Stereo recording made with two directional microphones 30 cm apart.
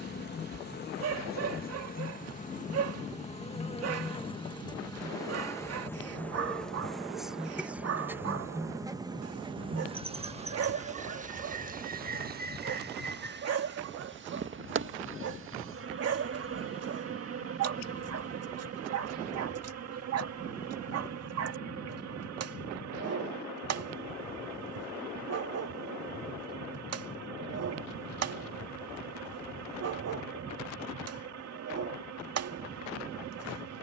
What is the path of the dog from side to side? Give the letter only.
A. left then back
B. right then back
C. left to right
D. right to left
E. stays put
E.